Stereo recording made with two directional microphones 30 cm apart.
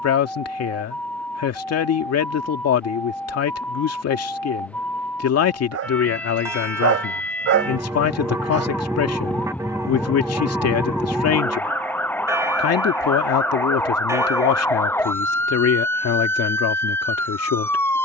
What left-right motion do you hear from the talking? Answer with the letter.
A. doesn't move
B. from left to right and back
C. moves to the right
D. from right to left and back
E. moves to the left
A.